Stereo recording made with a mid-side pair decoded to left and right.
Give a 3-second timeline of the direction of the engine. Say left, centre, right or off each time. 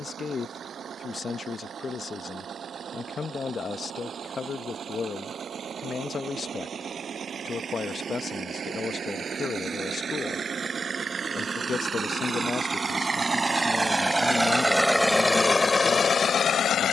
right, right, right, right, right, left.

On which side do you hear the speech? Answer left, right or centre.
left.